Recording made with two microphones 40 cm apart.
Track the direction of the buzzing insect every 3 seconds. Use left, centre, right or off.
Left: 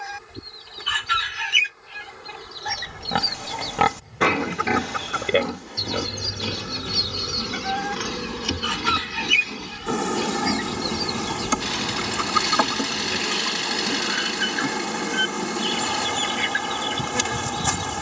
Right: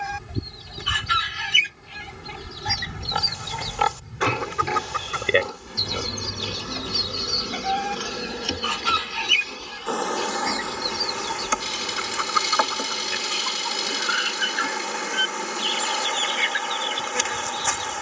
right, right, centre, left, left, left.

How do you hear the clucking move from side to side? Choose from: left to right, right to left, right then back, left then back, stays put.
right to left.